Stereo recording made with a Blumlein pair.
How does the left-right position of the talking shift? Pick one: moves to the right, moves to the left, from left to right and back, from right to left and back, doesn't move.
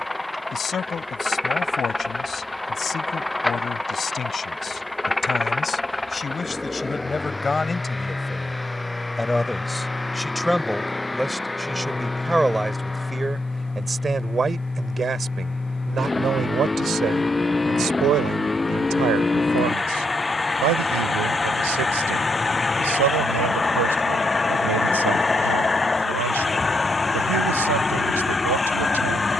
moves to the right.